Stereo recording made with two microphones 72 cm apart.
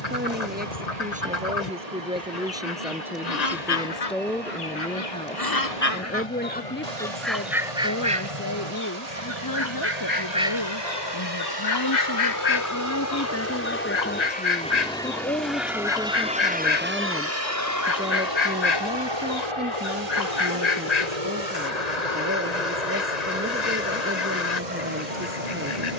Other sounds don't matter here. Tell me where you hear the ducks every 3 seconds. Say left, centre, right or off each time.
left, left, centre, centre, left, left, left, left, left.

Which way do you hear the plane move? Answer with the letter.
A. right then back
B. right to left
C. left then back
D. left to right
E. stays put
D.